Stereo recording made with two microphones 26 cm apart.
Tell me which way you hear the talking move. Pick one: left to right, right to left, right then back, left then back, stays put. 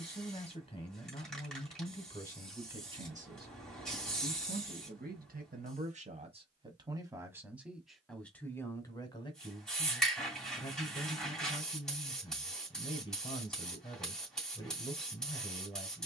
right then back.